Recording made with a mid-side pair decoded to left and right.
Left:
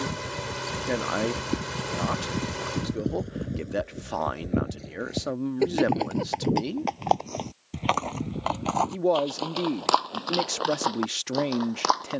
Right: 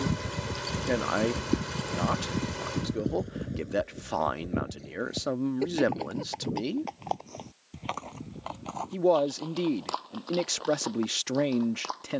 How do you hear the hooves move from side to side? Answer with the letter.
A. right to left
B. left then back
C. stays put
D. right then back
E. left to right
A.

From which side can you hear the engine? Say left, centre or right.
left.